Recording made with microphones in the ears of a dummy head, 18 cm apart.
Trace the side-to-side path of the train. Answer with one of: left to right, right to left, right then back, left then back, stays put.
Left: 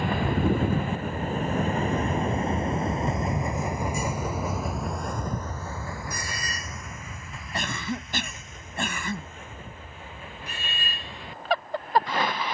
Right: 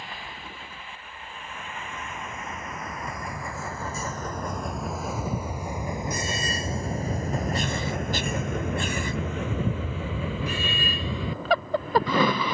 left to right.